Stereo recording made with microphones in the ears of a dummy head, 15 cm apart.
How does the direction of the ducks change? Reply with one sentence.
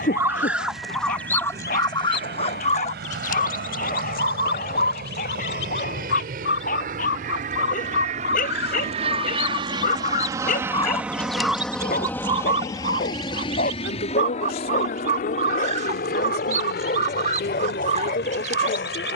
You can hear the ducks move from right to left and back again.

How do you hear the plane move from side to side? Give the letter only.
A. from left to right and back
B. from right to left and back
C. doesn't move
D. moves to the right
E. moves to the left
E.